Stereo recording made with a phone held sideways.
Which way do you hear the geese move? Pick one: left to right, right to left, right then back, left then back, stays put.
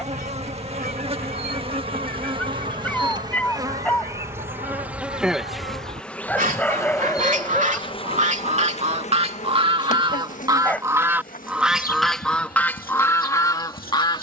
right to left.